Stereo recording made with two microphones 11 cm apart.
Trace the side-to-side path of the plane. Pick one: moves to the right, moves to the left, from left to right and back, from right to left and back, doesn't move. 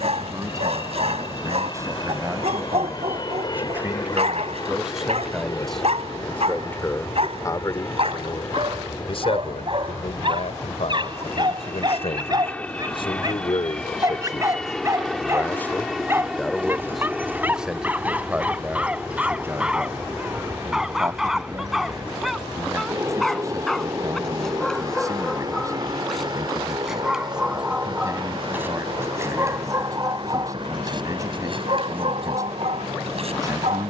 moves to the right.